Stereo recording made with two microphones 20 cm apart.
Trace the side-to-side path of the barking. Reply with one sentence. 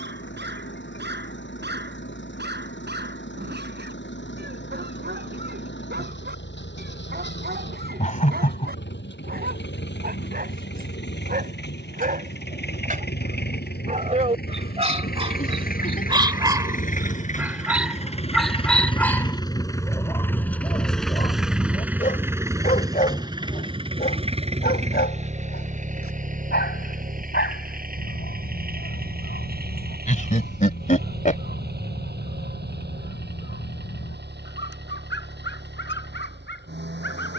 You can hear the barking move to the left.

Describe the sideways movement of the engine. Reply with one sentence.
In this clip you hear the engine move to the right.